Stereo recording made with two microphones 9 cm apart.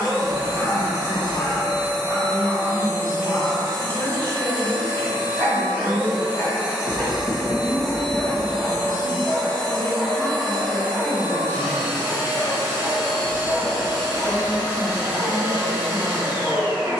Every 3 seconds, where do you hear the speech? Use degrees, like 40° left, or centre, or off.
60° left, 60° left, 50° left, 20° left, 20° right, 20° right.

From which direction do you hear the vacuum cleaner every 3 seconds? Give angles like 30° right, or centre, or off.
30° right, 30° right, centre, 10° right, 30° right, 30° right.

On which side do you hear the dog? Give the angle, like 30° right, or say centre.
30° left.